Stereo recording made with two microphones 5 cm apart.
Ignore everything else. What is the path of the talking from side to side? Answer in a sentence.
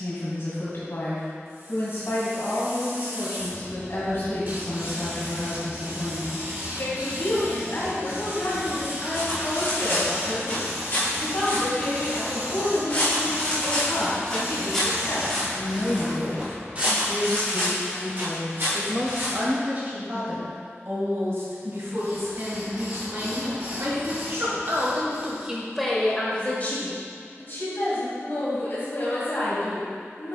In this clip you hear the talking go right and come back.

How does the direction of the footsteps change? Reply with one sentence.
In this clip you hear the footsteps travel towards the right.